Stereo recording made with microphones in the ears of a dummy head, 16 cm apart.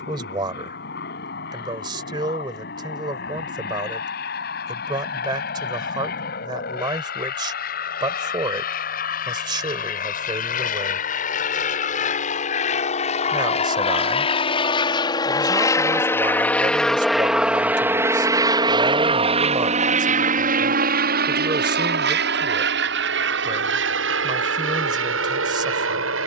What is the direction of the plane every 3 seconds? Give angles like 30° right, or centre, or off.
60° left, 60° left, 60° left, 50° left, 40° left, 10° left, 30° right, 60° right, 70° right.